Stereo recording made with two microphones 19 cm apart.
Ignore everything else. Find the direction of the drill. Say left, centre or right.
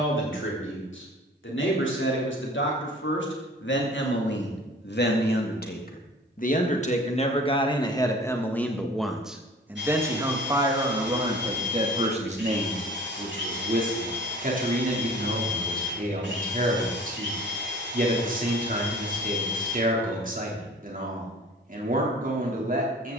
right.